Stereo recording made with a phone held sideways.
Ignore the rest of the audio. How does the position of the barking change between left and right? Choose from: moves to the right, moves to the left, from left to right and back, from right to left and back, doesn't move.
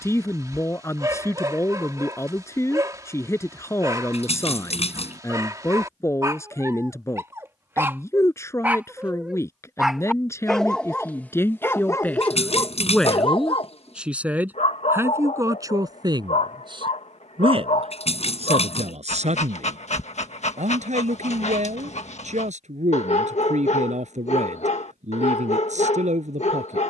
moves to the left.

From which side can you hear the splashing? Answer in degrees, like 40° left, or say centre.
50° left.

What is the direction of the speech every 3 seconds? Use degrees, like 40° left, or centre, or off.
20° left, 20° left, 20° left, 20° left, centre, 30° right, 60° right, 60° right, 60° right.